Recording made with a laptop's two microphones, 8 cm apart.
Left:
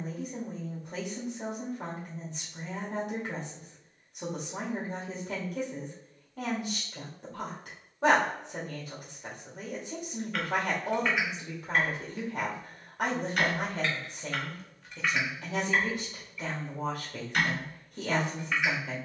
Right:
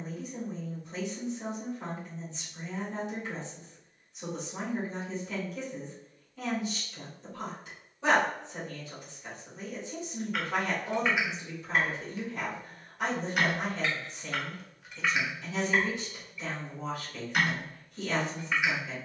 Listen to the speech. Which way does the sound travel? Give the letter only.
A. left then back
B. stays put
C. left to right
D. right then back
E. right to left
B.